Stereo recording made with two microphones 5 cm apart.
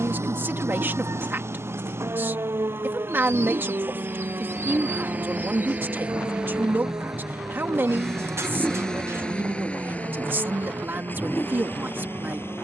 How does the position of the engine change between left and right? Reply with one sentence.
In this clip you hear the engine travel towards the left.